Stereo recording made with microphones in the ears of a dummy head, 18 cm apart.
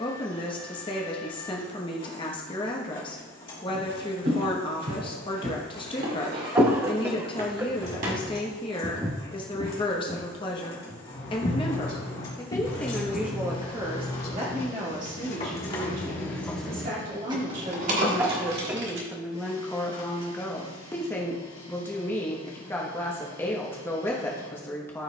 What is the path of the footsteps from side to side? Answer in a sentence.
In this clip you hear the footsteps go from the right side to the left.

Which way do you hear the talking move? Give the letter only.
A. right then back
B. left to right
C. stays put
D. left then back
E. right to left
A.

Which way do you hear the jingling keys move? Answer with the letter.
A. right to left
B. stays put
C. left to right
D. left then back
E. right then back
C.